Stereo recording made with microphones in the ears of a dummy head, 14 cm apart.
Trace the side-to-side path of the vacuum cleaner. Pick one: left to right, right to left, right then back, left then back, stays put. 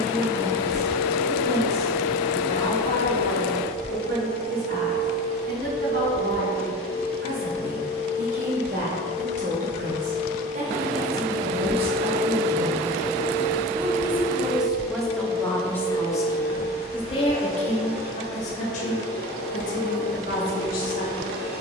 stays put.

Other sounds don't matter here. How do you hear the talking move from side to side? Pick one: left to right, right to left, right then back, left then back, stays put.
right to left.